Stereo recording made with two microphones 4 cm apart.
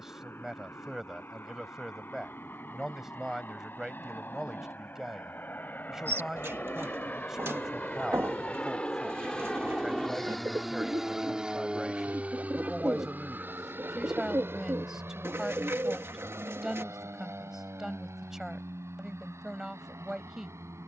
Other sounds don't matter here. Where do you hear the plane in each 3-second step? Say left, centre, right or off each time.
left, left, left, centre, right, right, right.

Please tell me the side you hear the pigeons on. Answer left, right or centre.
right.